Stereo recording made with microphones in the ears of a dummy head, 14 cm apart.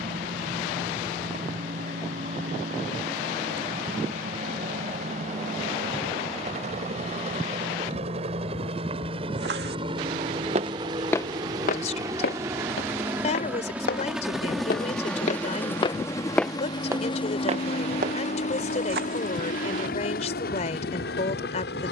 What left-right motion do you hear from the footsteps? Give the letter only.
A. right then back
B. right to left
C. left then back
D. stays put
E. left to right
C.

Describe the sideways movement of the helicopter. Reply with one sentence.
You can hear the helicopter travel towards the left.